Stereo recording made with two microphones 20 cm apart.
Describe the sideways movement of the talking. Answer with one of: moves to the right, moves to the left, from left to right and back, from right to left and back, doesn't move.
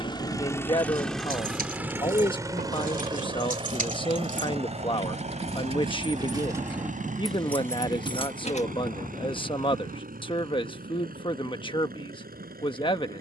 doesn't move.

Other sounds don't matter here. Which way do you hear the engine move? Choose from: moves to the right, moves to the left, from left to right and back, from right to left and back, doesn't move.
moves to the right.